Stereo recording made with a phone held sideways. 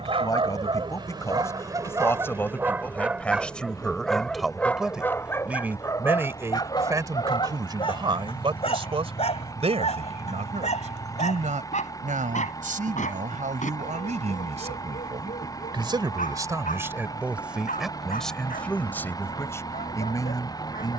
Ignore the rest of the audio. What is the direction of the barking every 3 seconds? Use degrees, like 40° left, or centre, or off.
30° right, 10° left, 30° left, 50° left, 60° left, 60° left, 70° left.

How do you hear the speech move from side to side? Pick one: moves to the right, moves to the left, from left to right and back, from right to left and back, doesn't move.
from left to right and back.